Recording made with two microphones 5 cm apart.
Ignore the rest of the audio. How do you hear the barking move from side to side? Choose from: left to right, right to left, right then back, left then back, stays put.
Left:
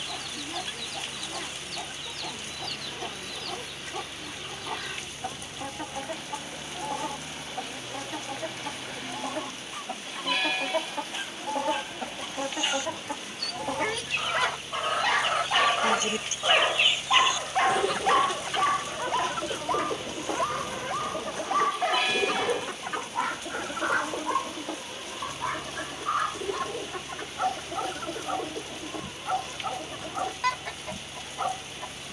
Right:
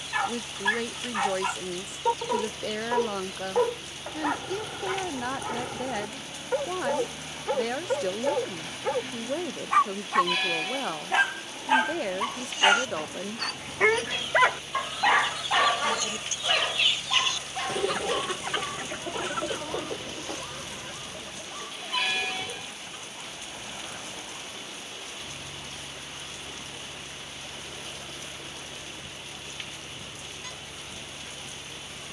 right to left.